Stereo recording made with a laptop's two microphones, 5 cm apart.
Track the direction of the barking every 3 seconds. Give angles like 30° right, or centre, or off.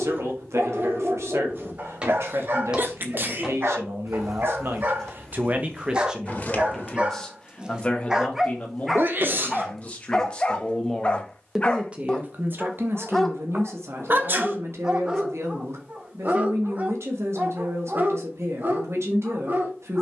50° right, 50° right, 20° right, 20° left, centre, 30° right, 50° right.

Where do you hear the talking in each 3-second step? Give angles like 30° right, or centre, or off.
80° right, 60° right, 10° left, 20° left, 60° right, 70° right, 70° right.